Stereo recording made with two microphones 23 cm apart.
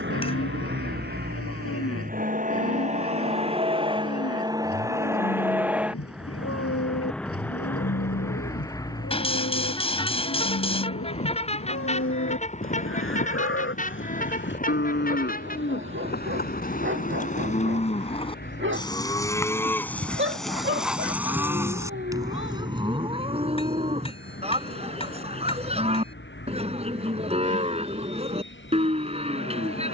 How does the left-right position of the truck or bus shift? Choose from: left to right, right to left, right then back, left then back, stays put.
right to left.